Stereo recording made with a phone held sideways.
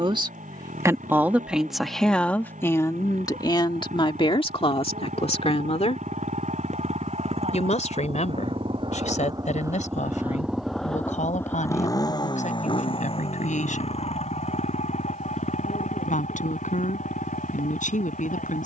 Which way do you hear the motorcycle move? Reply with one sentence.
You can hear the motorcycle go from the right side to the left.